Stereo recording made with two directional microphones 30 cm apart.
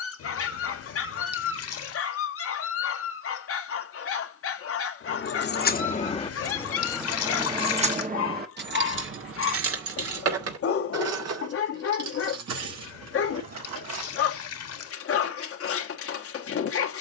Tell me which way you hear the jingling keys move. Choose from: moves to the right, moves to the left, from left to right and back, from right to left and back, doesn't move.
moves to the right.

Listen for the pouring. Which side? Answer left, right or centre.
left.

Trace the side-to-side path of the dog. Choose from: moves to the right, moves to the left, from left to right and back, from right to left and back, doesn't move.
doesn't move.